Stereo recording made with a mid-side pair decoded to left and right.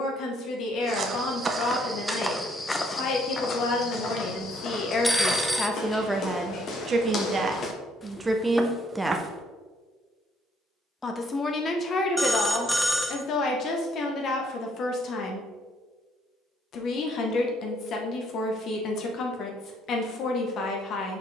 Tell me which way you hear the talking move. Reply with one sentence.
In this clip you hear the talking go right and come back.